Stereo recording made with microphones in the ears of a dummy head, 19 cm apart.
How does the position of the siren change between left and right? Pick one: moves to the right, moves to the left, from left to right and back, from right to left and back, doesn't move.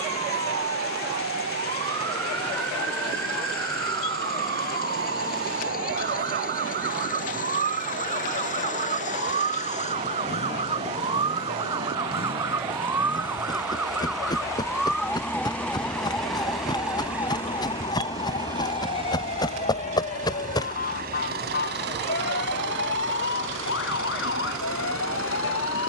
moves to the left.